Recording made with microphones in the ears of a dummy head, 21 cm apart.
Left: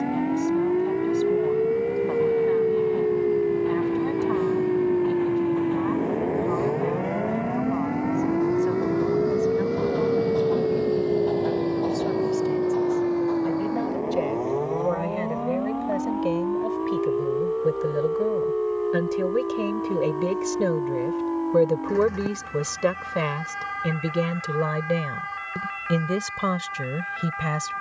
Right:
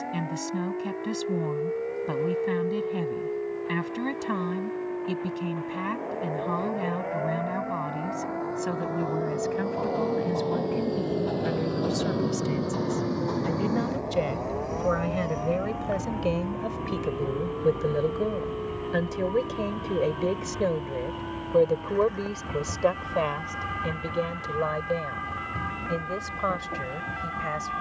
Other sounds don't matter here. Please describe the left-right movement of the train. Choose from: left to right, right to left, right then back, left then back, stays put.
left to right.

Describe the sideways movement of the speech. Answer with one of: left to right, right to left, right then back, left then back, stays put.
right to left.